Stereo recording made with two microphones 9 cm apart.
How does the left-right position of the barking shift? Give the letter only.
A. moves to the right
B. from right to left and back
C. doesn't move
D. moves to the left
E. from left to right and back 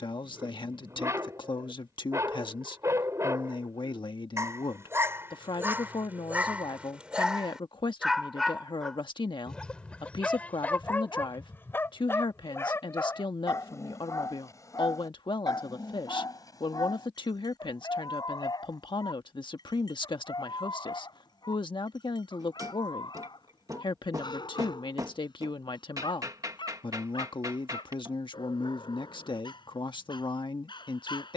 D.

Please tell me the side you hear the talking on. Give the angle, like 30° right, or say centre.
60° left.